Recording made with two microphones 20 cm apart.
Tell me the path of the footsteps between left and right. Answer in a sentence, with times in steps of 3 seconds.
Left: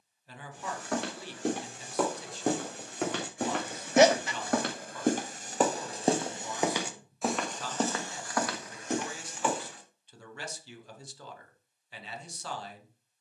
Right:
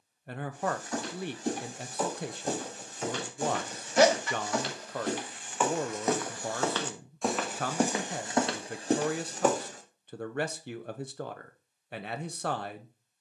You can hear the footsteps on the left from 0 s, in the centre from 6 s, on the right from 9 s and not at all from 12 s.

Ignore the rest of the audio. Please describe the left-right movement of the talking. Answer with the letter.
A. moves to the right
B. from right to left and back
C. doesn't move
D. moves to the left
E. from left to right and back
C.